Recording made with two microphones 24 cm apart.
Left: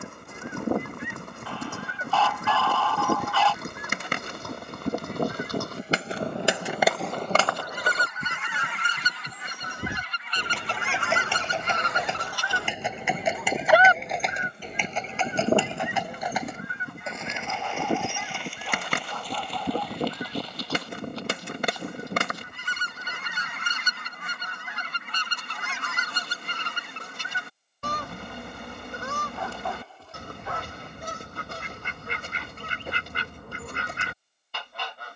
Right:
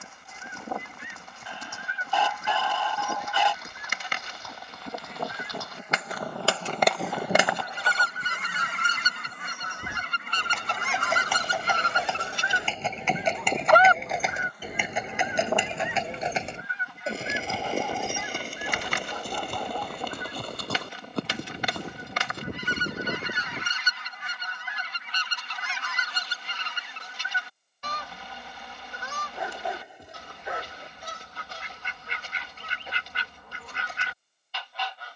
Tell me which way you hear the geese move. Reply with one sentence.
You can hear the geese go right and come back.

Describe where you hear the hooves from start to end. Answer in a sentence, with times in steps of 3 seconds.
You can hear the hooves on the left from 0 s, in the centre from 12 s, on the right from 15 s and not at all from 24 s.